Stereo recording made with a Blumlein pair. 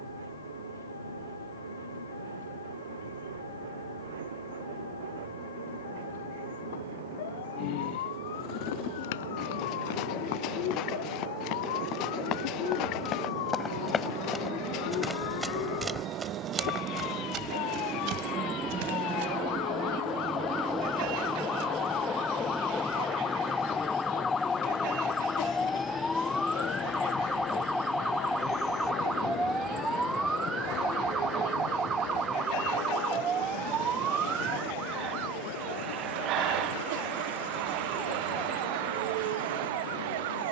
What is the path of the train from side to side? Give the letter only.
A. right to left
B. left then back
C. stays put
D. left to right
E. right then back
A.